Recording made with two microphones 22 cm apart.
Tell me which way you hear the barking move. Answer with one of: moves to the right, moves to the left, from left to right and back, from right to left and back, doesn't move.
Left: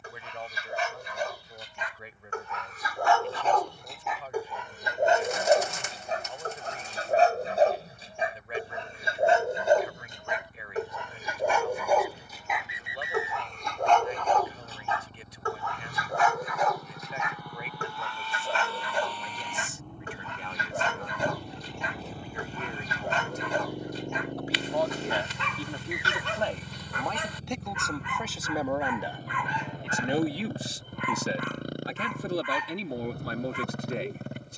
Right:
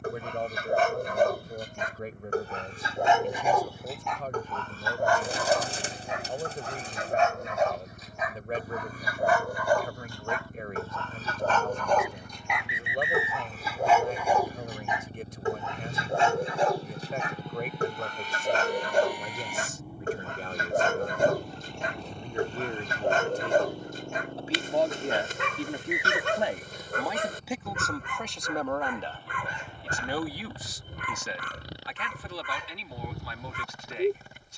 from right to left and back.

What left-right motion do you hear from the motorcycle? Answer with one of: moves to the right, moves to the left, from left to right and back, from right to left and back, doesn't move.
moves to the left.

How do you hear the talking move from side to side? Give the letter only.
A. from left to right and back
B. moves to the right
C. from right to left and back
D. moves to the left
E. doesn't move
D.